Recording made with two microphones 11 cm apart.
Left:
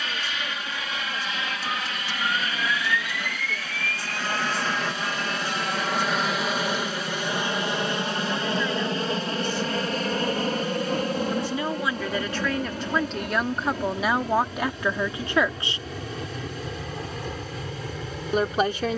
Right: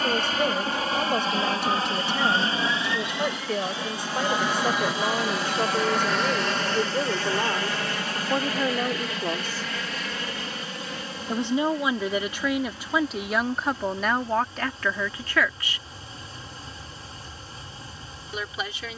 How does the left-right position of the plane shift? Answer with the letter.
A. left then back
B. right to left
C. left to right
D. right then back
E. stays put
B.